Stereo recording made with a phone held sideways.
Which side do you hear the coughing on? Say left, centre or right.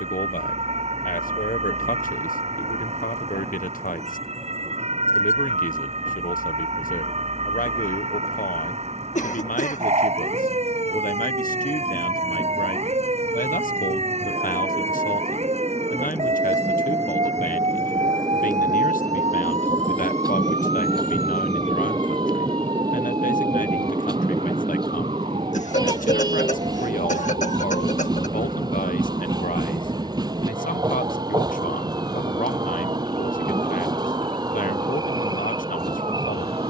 left.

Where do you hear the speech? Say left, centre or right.
left.